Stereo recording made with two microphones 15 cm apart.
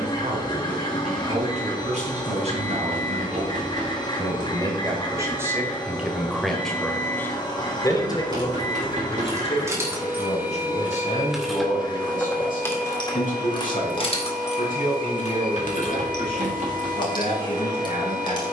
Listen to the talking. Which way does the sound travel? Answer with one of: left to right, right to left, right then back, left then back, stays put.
right to left.